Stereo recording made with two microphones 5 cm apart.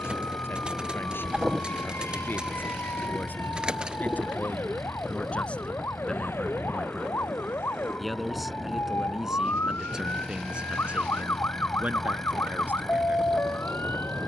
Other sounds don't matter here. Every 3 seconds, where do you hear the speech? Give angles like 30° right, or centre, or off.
50° left, 30° left, 10° left, 20° right, 40° right.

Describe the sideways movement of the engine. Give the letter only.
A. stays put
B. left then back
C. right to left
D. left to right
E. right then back
A.